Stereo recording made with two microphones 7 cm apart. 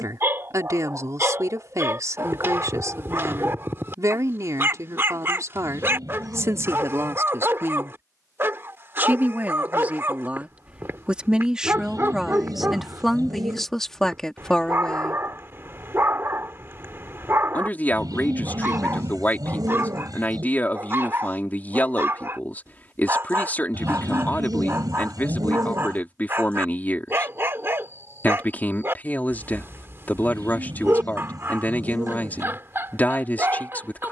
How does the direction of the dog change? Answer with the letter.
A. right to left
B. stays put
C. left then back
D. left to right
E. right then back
B.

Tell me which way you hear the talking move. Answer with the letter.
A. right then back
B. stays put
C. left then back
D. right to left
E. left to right
D.